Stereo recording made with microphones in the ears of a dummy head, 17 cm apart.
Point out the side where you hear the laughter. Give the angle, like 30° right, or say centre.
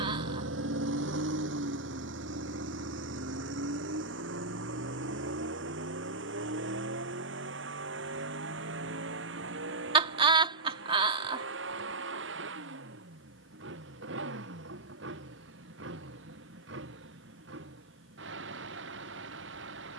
30° right.